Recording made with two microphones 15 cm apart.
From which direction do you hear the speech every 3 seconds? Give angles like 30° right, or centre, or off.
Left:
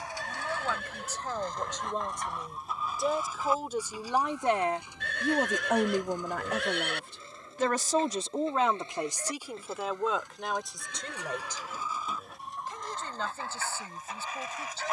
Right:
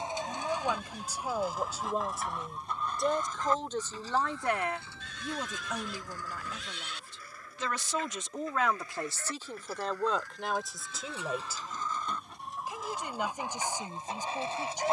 10° right, 30° left, 50° left, centre, 10° right.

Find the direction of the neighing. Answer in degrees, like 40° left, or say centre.
70° left.